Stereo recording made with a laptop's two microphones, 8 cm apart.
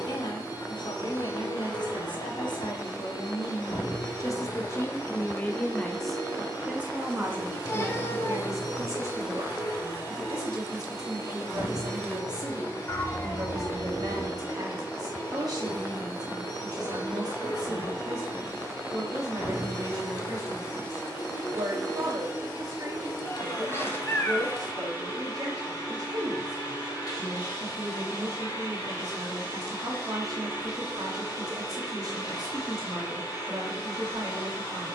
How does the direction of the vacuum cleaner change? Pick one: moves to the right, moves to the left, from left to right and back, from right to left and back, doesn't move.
doesn't move.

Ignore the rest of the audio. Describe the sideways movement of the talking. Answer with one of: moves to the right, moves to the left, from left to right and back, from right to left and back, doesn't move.
moves to the right.